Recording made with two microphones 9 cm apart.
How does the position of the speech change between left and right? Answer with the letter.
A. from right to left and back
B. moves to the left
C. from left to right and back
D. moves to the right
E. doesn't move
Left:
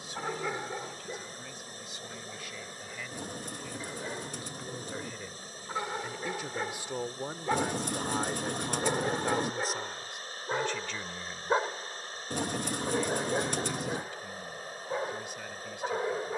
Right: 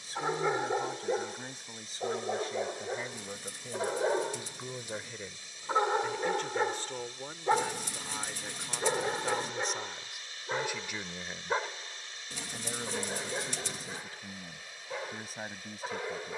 A.